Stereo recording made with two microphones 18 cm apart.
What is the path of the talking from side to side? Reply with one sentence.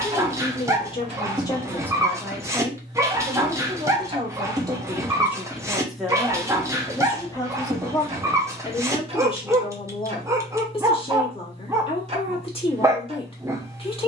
In this clip you hear the talking move from left to right and back again.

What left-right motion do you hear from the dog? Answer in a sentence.
In this clip you hear the dog stay in one place.